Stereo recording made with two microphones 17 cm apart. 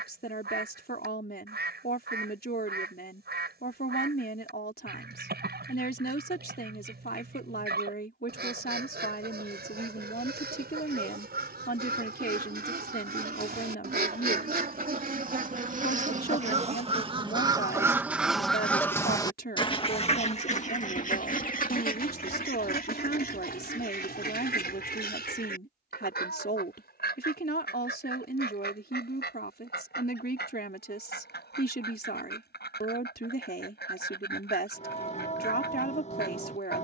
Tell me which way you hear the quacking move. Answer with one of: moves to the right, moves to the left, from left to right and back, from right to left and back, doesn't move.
moves to the left.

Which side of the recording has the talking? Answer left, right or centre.
left.